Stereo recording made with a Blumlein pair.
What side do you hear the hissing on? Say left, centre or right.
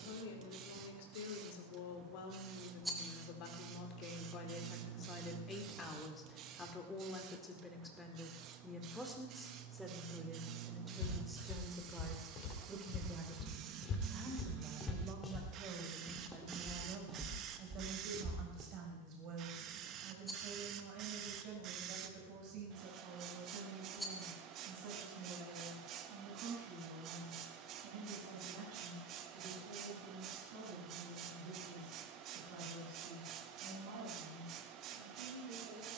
right.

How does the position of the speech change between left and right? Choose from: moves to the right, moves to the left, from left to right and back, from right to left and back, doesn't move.
moves to the right.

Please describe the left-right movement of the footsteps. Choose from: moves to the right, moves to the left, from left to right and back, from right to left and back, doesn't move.
moves to the right.